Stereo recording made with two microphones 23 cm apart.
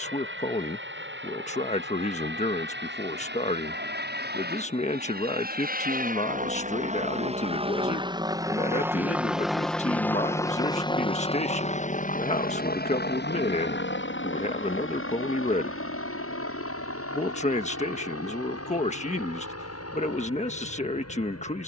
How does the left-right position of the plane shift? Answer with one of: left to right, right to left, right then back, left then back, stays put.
right to left.